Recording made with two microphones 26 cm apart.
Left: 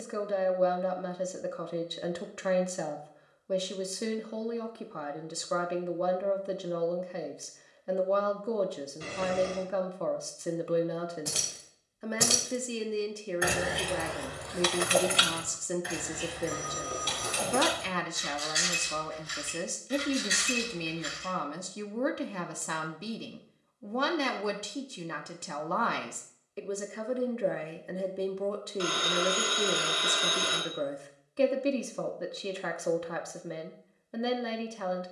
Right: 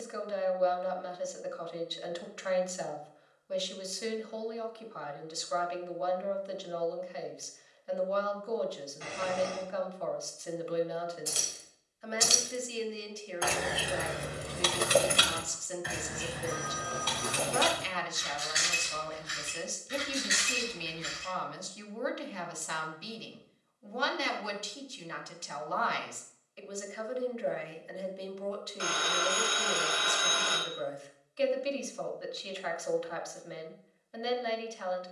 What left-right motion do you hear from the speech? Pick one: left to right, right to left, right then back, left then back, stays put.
stays put.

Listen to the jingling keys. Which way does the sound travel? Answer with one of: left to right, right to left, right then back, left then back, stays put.
left to right.